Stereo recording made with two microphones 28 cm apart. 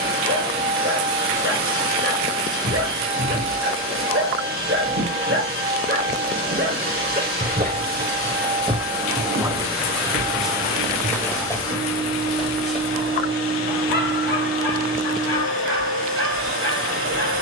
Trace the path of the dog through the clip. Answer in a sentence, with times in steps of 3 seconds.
You can hear the dog on the right from 0 s, in the centre from 9 s and on the left from 12 s.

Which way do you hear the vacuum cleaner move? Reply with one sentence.
In this clip you hear the vacuum cleaner stay put.